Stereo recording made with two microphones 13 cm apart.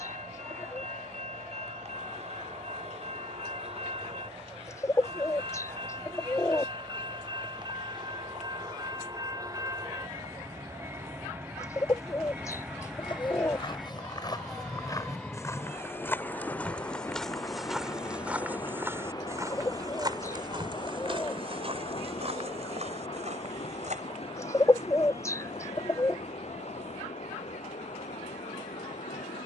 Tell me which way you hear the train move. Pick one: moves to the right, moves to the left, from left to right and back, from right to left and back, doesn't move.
moves to the left.